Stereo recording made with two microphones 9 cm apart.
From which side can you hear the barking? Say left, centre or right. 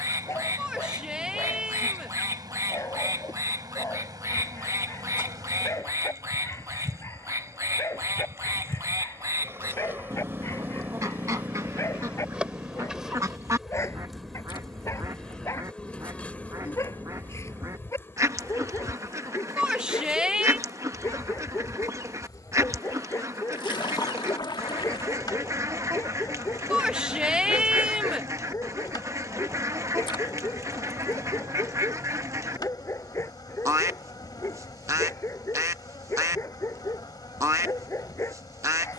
left.